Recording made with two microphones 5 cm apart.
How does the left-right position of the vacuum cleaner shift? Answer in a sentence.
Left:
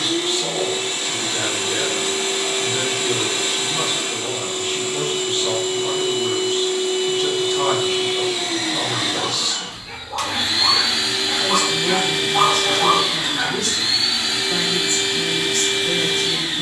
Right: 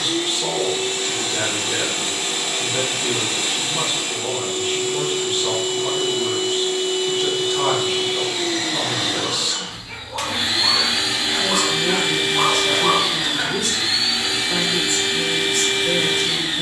In this clip you hear the vacuum cleaner travel towards the right.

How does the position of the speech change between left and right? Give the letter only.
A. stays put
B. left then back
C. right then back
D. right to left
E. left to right
A.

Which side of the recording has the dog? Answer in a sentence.
You can hear the dog on the left.